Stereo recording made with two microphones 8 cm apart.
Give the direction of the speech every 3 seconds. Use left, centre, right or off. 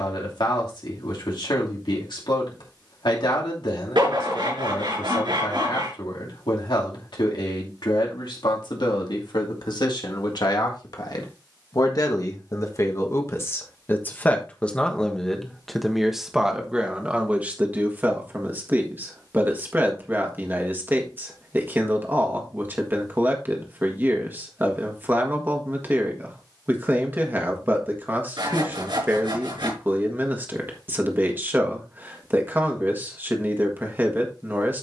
left, left, left, left, left, centre, right, right, right, right, right, right.